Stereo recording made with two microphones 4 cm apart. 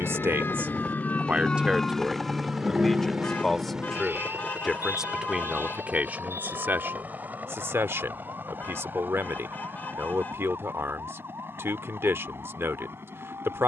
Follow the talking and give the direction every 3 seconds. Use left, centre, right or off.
right, centre, right, right, right.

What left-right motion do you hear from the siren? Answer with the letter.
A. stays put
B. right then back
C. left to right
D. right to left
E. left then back
C.